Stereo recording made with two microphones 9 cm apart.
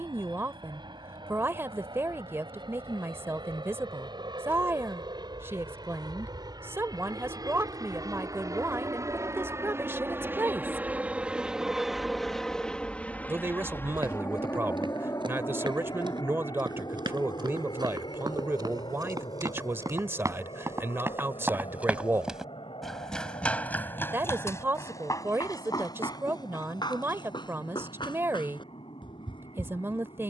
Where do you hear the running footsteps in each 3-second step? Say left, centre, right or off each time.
off, off, off, off, right, right, right, centre, left, left.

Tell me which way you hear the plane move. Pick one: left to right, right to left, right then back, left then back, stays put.
right to left.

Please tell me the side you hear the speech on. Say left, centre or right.
right.